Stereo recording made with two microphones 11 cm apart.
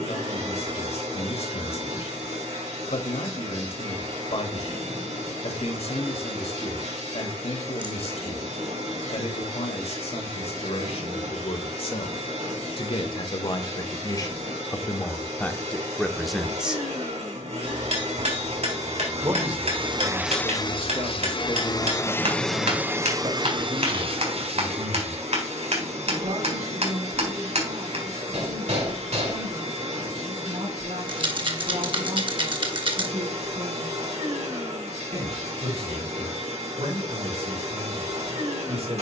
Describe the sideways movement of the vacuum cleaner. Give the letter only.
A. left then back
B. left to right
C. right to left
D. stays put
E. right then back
A.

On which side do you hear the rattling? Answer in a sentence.
You can hear the rattling on the right.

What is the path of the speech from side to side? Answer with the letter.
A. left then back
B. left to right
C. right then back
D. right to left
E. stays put
B.